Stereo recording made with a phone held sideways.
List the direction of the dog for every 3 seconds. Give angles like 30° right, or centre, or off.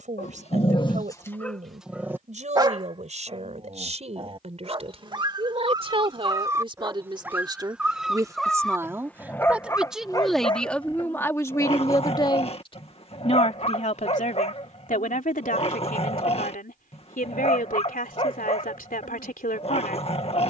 10° left, 30° right, 10° right, 30° left, 40° left, 40° left, 40° left.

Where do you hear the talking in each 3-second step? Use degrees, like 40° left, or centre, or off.
50° right, 40° right, 30° right, 10° left, 40° left, 60° left, 70° left.